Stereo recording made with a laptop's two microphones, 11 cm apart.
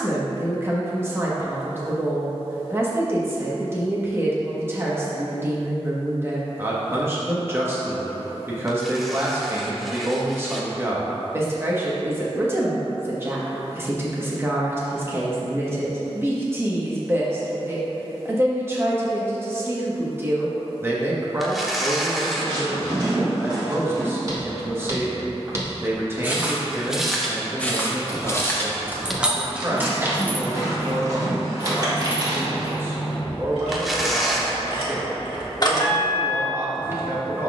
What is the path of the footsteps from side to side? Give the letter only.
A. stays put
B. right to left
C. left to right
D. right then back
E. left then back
E.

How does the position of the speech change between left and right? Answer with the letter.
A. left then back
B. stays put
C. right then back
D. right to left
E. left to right
B.